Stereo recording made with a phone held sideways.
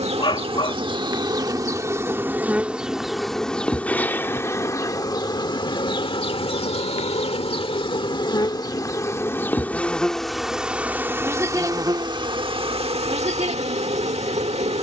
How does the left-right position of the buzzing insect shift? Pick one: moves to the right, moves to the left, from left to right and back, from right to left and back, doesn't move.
from right to left and back.